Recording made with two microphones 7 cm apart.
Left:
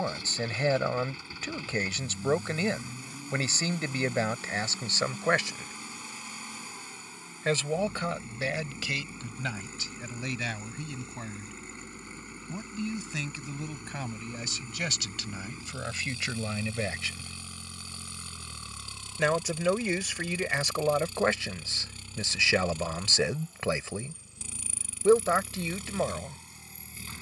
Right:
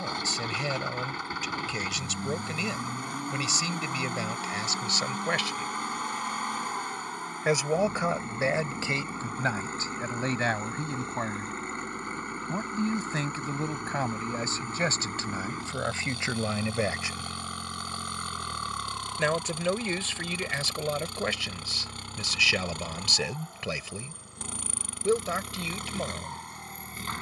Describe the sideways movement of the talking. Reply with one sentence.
You can hear the talking move from left to right and back again.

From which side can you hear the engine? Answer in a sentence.
In this clip you hear the engine on the right.